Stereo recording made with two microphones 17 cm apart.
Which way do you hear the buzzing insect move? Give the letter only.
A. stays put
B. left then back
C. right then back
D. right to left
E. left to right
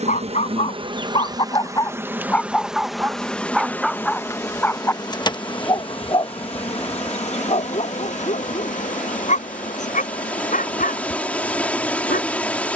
D.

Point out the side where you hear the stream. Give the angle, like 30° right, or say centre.
10° left.